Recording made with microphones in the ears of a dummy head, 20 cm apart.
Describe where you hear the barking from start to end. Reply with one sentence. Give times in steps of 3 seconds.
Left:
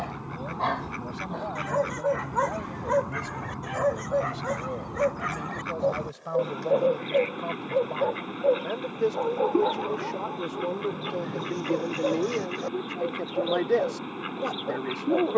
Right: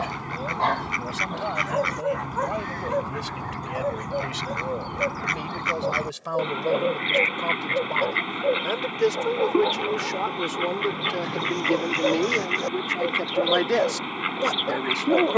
In this clip you hear the barking in the centre from 0 s, on the left from 3 s, in the centre from 9 s and on the right from 12 s.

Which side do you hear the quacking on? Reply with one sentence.
You can hear the quacking on the right.